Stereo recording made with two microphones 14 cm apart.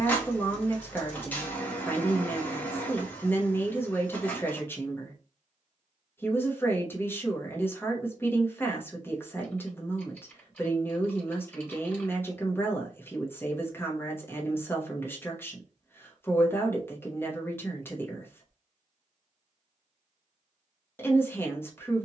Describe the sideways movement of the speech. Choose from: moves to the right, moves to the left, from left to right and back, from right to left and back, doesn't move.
doesn't move.